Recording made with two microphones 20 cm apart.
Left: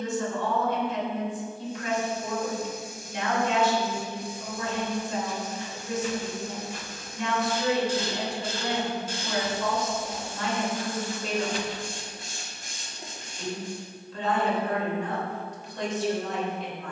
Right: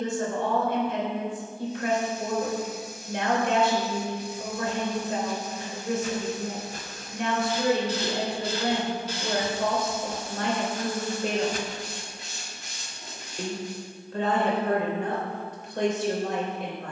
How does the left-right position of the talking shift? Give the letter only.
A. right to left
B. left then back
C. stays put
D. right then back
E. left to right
C.